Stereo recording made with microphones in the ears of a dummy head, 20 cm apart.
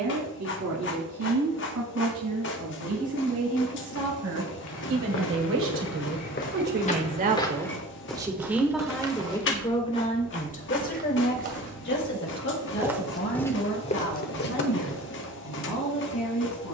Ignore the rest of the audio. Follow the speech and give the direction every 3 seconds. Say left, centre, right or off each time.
right, right, right, left, left, left.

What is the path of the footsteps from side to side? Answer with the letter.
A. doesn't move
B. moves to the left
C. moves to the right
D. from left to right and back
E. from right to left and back
D.